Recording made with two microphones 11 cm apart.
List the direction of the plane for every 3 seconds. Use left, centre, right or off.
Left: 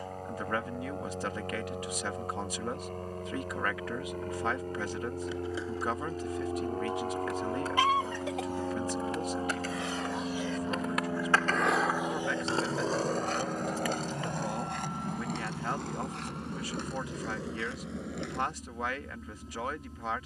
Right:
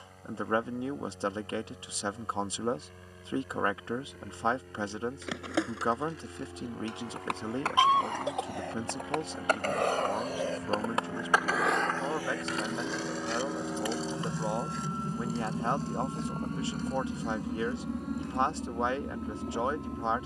left, left, left, left, centre, right, right.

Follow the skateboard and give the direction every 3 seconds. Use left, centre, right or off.
off, right, right, right, left, left, left.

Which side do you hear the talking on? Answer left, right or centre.
right.